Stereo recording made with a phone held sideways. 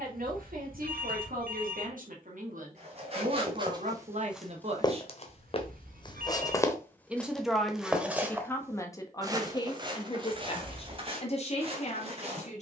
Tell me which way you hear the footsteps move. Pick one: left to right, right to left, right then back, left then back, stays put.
left then back.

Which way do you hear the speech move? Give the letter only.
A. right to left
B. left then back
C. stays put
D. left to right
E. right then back
A.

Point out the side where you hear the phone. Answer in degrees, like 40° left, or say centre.
70° right.